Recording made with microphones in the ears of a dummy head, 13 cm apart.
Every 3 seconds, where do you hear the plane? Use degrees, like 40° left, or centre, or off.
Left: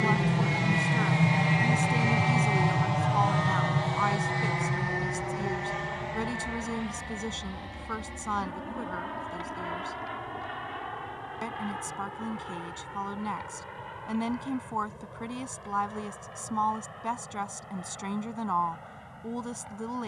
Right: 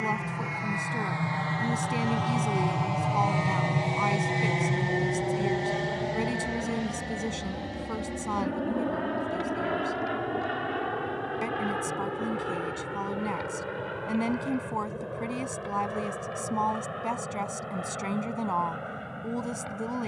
20° left, 20° right, 50° right, 60° right, 70° right, 70° right, 70° right.